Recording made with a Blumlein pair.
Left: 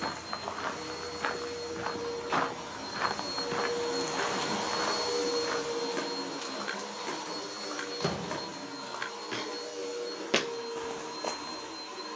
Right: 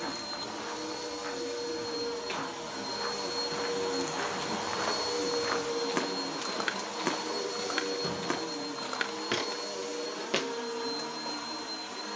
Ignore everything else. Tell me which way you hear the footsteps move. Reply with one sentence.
In this clip you hear the footsteps move from left to right and back again.